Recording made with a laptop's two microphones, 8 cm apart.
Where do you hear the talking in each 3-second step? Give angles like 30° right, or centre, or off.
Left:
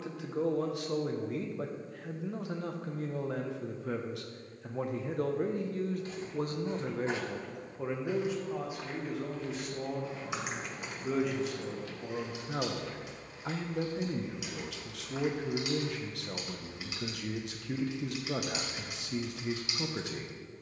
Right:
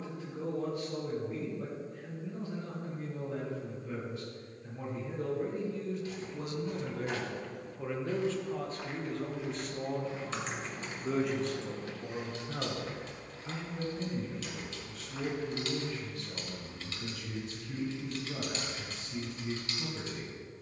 80° left, 70° left, 20° left, centre, 50° left, 70° left, 70° left.